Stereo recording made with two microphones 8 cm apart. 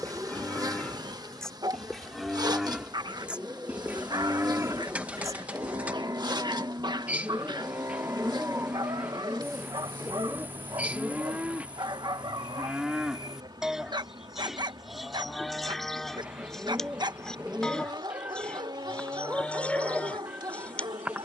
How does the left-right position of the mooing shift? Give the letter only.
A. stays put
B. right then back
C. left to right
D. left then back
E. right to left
B.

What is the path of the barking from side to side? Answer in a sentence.
In this clip you hear the barking stay in one place.